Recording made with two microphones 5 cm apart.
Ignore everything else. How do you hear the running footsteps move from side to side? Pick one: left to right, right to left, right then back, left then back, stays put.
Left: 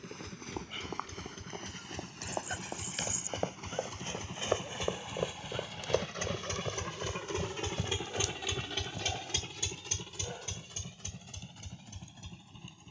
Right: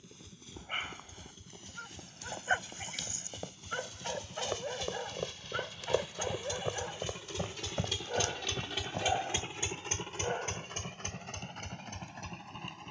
left to right.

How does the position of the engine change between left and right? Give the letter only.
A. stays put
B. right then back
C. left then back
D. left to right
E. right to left
D.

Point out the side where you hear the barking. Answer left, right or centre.
right.